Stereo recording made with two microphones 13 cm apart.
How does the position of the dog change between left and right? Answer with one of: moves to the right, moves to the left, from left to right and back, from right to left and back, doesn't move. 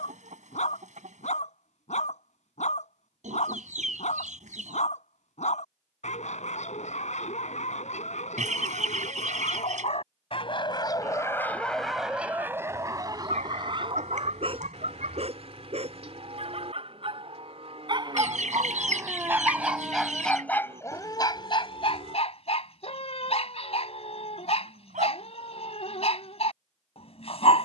from left to right and back.